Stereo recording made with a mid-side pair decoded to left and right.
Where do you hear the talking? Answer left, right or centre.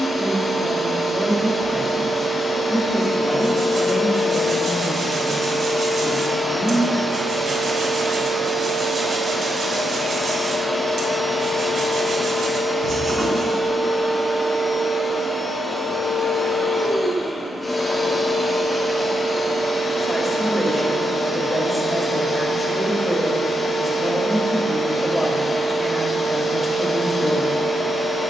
centre.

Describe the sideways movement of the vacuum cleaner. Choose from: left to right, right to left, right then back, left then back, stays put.
right then back.